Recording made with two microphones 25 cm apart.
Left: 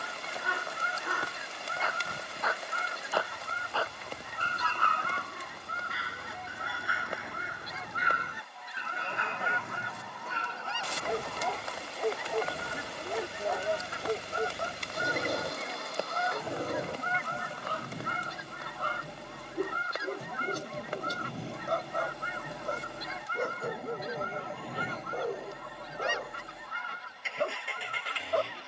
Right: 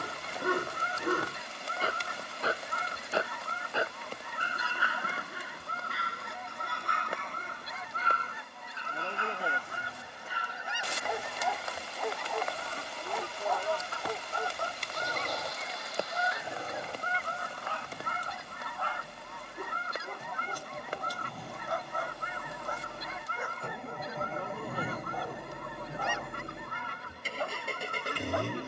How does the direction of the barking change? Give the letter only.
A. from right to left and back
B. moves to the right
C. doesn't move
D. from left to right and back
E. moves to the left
E.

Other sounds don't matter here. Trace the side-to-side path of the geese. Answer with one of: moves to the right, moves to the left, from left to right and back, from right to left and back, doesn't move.
from right to left and back.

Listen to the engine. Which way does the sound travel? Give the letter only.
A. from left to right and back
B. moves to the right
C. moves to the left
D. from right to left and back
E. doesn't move
B.